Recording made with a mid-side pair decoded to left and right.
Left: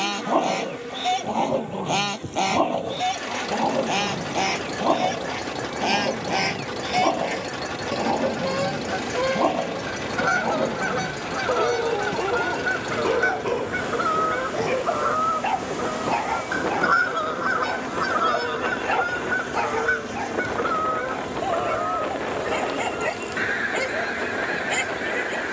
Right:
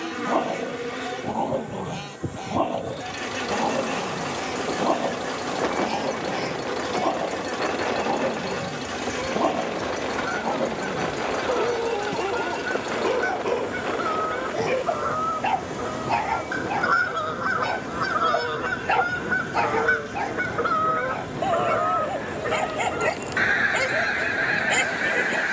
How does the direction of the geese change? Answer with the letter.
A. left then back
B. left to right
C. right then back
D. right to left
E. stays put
B.